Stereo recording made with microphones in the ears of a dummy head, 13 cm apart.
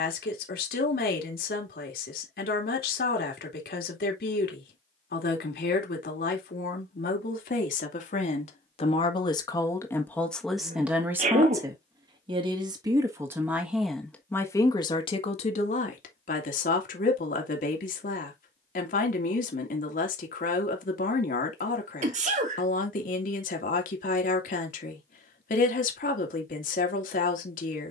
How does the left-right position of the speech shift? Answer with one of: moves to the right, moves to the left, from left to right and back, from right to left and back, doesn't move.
from left to right and back.